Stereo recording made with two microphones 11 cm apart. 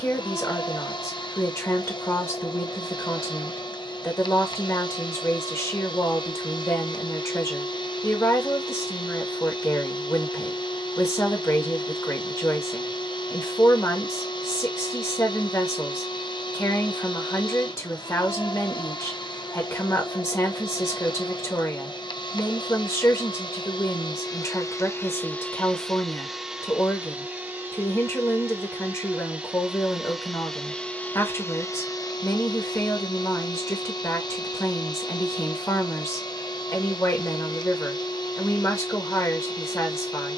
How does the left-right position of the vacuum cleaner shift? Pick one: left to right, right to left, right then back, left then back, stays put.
right then back.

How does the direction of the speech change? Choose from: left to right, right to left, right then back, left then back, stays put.
stays put.